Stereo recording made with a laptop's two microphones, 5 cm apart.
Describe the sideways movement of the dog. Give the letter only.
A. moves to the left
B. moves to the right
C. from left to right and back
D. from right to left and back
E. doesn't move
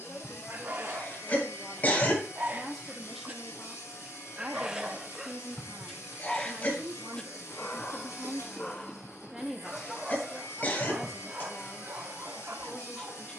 D.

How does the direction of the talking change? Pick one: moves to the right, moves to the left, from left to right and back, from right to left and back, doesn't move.
from left to right and back.